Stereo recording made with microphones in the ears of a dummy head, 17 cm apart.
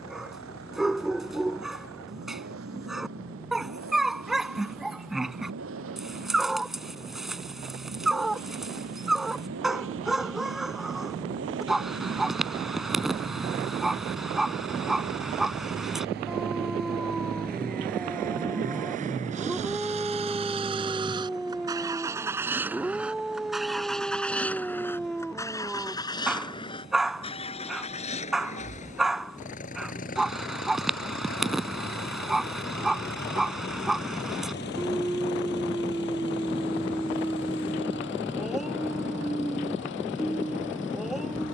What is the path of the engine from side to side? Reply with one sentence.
You can hear the engine move from right to left.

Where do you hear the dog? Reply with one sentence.
You can hear the dog in the centre.